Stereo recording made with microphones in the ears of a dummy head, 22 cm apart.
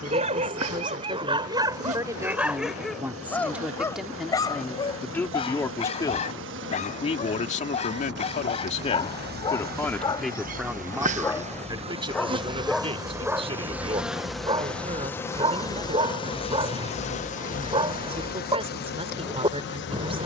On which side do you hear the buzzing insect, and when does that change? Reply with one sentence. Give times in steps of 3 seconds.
You can hear the buzzing insect on the right from 0 s, in the centre from 12 s and on the left from 15 s.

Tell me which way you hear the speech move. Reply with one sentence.
In this clip you hear the speech go left and come back.